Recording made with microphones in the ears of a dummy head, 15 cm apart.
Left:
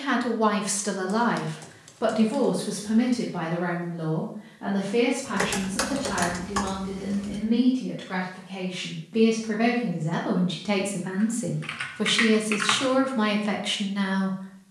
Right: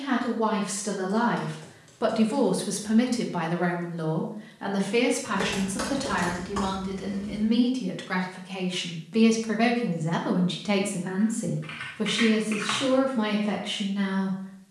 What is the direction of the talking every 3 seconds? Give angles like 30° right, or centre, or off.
10° left, 50° right, 50° right, 10° right, 30° left.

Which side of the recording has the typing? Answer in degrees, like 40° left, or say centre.
40° left.